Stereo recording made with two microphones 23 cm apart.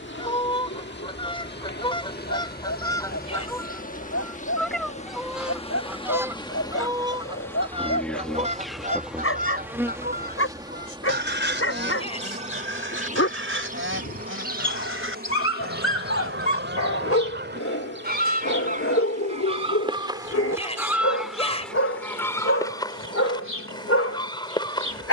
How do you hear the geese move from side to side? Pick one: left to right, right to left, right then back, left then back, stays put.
right then back.